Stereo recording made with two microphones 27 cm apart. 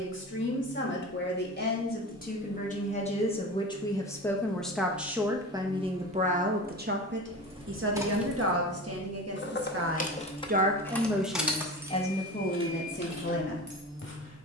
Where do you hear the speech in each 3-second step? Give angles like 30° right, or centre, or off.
40° left, centre, 40° right, 30° right, 40° left.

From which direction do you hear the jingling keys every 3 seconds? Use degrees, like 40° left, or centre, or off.
off, off, 10° right, 20° left, 20° right.